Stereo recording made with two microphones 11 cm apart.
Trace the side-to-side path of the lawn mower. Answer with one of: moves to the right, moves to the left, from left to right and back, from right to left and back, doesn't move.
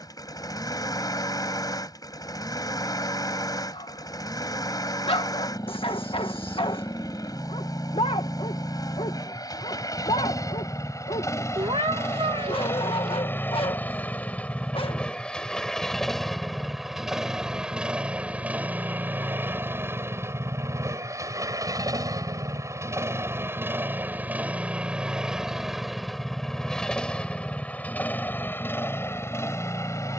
from left to right and back.